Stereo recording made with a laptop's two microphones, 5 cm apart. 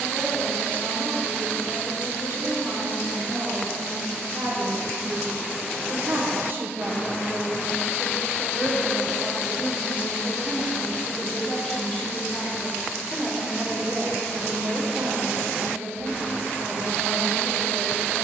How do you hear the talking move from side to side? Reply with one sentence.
You can hear the talking move from right to left and back again.